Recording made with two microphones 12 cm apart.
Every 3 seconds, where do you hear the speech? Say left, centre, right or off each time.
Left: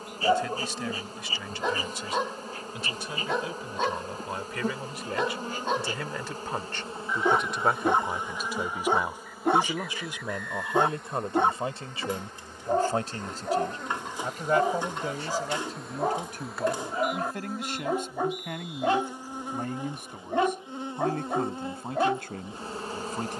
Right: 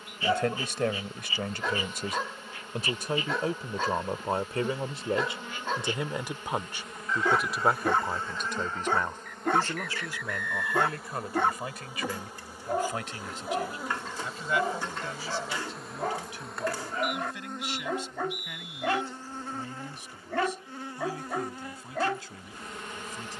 right, right, centre, left, left, left, left, left.